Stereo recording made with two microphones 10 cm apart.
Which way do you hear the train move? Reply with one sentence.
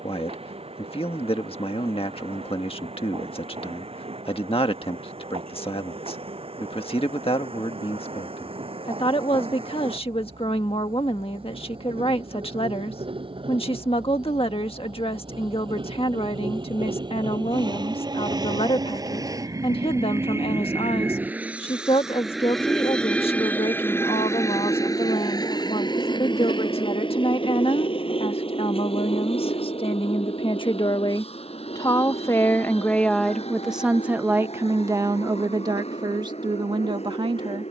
You can hear the train travel towards the left.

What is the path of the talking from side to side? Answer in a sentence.
You can hear the talking go from the left side to the right.